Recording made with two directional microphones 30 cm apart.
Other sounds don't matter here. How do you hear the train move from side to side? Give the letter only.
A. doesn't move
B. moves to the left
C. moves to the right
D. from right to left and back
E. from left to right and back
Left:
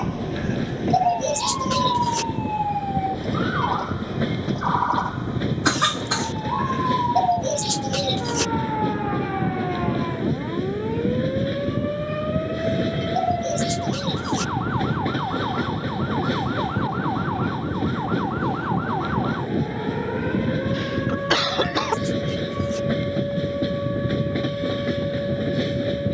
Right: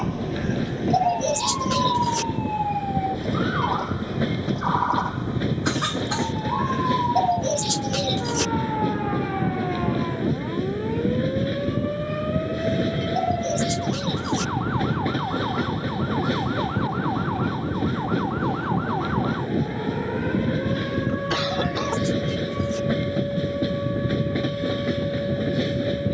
A.